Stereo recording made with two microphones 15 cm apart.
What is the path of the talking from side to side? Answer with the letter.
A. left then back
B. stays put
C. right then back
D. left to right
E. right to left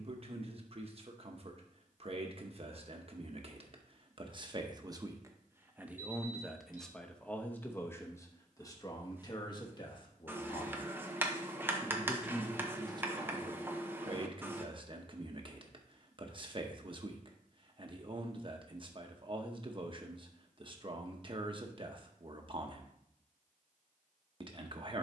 A.